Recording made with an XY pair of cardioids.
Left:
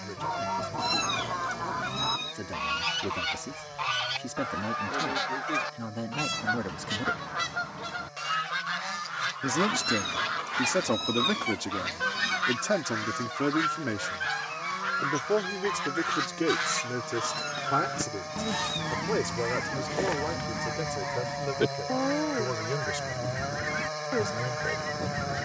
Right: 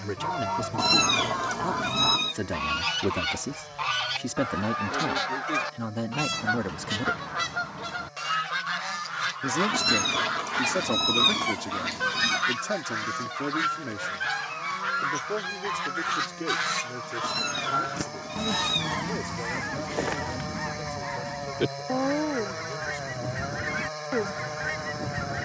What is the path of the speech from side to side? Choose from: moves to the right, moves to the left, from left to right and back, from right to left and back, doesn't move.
moves to the left.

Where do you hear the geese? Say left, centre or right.
centre.